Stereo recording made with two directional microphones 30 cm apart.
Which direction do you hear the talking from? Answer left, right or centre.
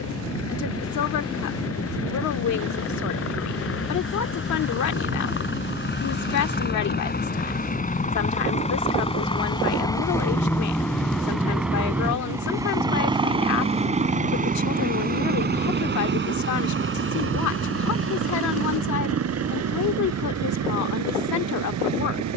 left.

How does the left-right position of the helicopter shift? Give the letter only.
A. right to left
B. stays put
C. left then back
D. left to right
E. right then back
D.